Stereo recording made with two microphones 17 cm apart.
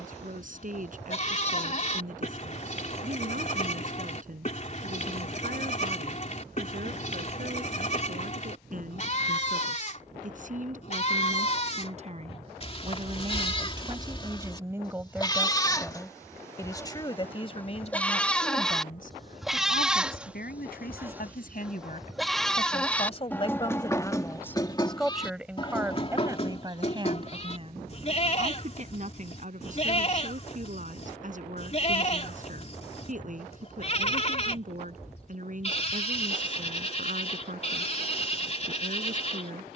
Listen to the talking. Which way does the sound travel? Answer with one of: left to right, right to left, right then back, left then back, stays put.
left then back.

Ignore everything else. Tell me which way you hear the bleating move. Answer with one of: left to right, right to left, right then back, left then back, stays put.
right then back.